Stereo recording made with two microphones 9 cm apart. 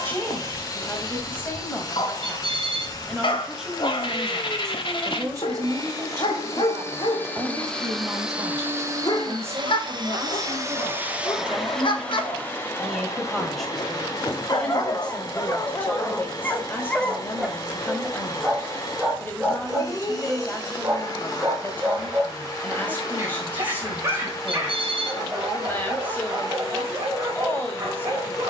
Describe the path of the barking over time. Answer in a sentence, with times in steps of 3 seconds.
In this clip you hear the barking on the left from 0 s, in the centre from 18 s and on the right from 21 s.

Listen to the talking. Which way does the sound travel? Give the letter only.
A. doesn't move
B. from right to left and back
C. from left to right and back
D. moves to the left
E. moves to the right
C.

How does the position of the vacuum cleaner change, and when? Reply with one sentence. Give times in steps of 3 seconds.
In this clip you hear the vacuum cleaner on the left from 0 s, in the centre from 6 s, on the right from 9 s and on the left from 12 s.